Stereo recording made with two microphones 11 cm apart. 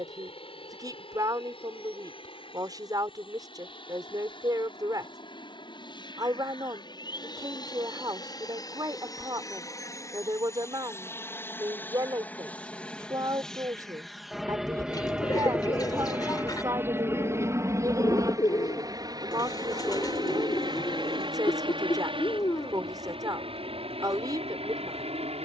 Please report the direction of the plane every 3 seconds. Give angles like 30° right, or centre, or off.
60° left, 50° left, 40° left, 30° left, centre, 20° right, 40° right, 50° right, 60° right.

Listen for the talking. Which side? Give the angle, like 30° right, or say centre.
40° right.